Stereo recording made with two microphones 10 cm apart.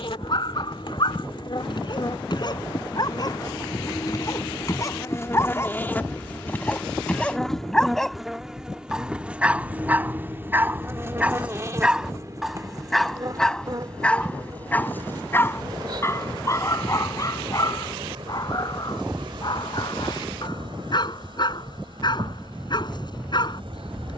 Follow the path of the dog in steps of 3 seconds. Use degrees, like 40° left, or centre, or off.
50° left, 30° left, 10° left, 10° right, 10° left, 30° left, 40° left, 50° left.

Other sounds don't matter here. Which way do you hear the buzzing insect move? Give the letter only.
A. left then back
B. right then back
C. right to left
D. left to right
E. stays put
D.